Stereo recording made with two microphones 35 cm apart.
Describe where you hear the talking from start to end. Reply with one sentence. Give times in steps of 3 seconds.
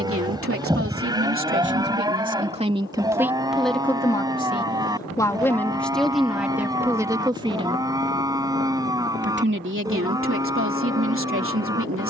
In this clip you hear the talking on the right from 0 s, in the centre from 3 s and on the right from 9 s.